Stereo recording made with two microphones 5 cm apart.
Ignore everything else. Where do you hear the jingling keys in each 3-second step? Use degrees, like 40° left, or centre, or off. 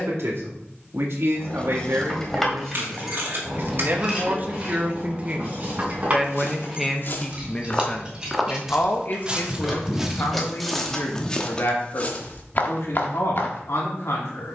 10° left, 20° right, 20° right, 10° left, off.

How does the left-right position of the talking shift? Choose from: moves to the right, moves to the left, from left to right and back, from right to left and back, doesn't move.
moves to the left.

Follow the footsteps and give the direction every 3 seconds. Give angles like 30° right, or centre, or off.
off, off, 30° left, centre, 50° left.